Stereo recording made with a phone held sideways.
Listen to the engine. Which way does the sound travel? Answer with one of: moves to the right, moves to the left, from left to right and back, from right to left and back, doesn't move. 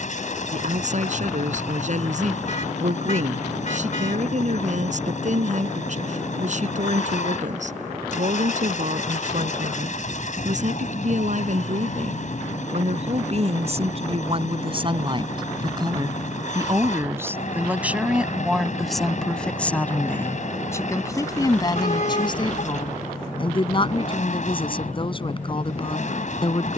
doesn't move.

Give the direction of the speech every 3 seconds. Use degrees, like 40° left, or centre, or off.
50° right, 50° right, 50° right, 50° right, 40° right, 20° right, 10° left, 30° left, 30° left.